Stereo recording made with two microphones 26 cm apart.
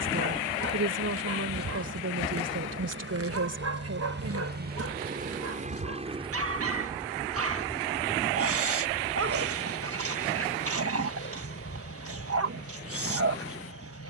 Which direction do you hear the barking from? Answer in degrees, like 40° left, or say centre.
60° right.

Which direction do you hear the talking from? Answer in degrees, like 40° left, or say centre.
70° right.